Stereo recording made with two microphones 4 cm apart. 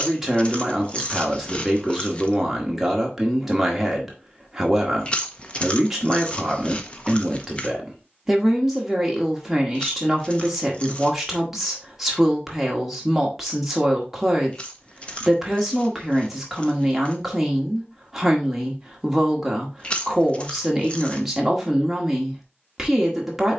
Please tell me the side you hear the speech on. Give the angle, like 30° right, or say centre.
10° right.